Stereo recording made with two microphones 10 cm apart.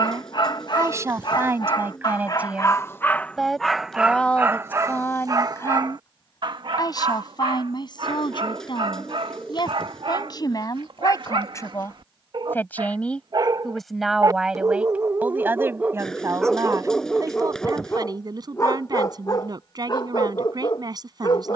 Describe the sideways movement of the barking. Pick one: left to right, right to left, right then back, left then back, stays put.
right then back.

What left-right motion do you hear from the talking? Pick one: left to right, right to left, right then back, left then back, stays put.
left then back.